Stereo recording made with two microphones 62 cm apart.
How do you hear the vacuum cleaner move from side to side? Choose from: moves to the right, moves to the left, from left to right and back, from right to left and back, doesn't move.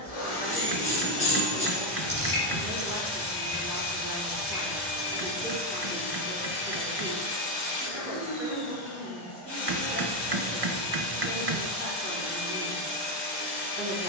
doesn't move.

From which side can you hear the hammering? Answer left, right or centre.
right.